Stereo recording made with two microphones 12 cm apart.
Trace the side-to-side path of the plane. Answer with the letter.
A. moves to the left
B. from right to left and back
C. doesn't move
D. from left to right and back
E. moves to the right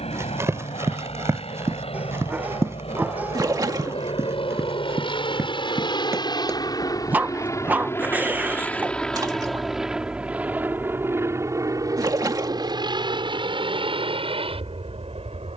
E.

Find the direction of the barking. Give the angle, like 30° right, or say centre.
10° right.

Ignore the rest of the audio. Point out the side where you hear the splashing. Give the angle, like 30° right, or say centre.
30° right.